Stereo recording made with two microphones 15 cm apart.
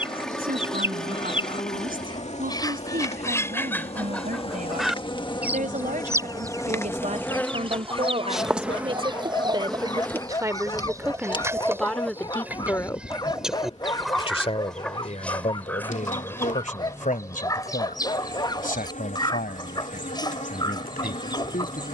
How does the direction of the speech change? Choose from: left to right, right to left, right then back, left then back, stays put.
right to left.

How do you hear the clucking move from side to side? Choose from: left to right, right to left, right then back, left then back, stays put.
right then back.